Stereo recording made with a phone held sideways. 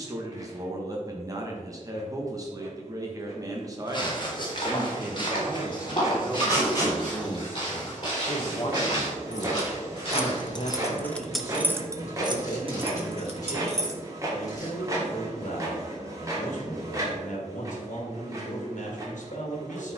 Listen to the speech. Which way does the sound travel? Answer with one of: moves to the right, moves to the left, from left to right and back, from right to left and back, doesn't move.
moves to the left.